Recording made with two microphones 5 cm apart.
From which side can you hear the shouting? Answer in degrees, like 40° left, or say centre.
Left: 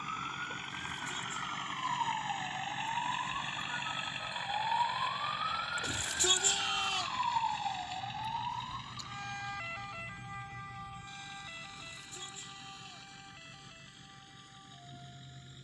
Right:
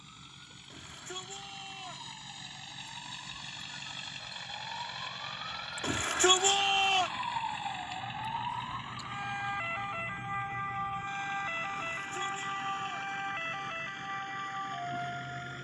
50° right.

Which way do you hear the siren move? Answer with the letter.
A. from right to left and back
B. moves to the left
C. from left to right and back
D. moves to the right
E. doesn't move
D.